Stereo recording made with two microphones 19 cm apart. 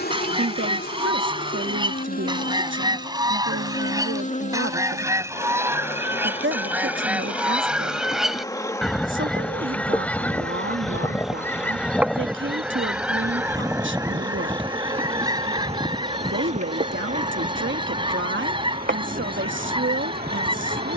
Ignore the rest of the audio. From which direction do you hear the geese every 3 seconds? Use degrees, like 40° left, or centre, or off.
20° right, 20° right, 10° right, 10° left, 10° right, 20° right, 30° right.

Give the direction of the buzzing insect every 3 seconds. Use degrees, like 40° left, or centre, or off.
50° left, 40° left, 20° left, centre, 20° right, 30° right, 50° right.